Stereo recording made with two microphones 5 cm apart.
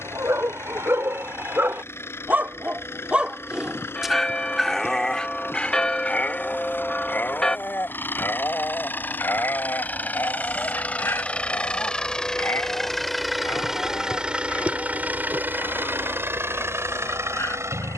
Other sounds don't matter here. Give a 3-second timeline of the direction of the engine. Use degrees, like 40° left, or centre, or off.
50° left, 50° left, 40° left, 30° left, 10° right, 60° right.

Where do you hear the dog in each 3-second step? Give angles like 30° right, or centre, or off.
50° right, centre, 40° left, 50° left, 60° left, 60° left.